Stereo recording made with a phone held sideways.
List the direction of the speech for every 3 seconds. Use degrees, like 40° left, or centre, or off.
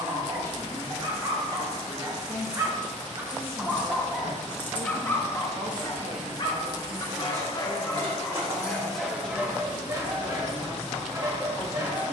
20° left, 50° right, 30° right, 10° left.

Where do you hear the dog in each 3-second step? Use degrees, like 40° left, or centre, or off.
30° right, 10° left, 20° left, 20° right.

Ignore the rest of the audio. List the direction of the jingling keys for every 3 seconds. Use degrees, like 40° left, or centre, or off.
40° right, 20° left, 30° right, 60° right.